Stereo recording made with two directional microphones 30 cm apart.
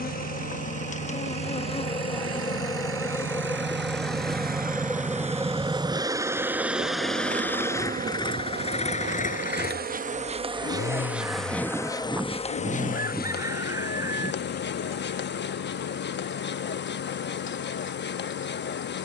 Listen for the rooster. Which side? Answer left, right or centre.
centre.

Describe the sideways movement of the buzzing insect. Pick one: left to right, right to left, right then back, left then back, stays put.
right then back.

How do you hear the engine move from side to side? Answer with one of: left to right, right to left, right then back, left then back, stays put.
right to left.